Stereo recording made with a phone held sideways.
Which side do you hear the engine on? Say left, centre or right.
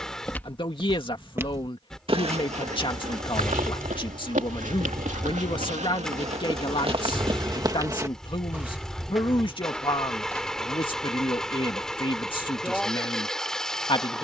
centre.